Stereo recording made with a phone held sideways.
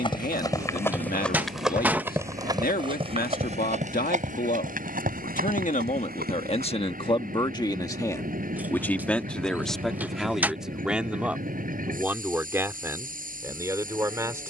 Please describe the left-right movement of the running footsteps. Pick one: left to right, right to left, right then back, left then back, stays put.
left to right.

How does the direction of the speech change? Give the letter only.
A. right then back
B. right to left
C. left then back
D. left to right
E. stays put
D.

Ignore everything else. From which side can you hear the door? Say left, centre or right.
centre.